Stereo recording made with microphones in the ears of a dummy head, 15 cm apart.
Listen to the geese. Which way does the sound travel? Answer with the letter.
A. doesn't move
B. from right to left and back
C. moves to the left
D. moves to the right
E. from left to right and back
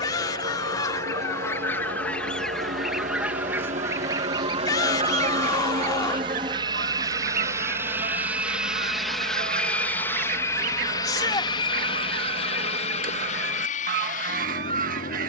D.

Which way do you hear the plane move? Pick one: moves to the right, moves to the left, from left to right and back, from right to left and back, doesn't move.
moves to the left.